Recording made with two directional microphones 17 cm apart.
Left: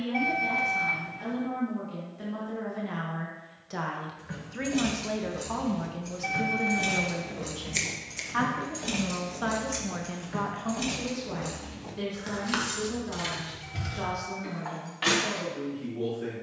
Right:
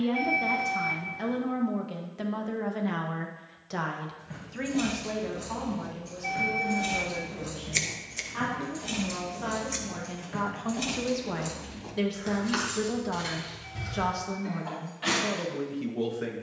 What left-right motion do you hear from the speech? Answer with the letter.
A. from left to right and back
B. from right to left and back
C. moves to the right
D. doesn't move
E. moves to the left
B.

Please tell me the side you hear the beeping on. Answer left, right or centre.
left.